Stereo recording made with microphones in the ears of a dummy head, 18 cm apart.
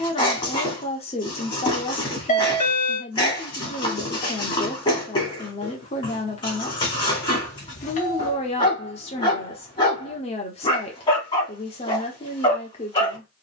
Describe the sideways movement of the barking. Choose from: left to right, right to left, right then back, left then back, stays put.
stays put.